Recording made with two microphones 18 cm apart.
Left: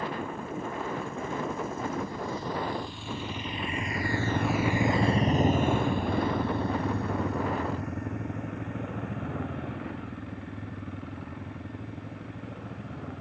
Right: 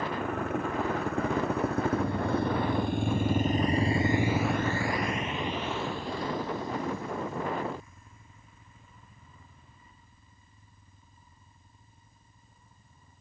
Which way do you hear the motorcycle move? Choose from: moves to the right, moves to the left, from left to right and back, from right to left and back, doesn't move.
moves to the left.